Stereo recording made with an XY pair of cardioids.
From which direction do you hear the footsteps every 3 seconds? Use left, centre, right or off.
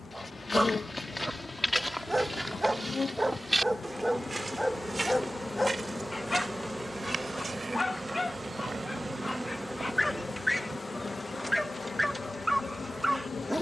centre, right, right, right, off.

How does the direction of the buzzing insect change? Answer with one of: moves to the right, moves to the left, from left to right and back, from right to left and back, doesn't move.
from left to right and back.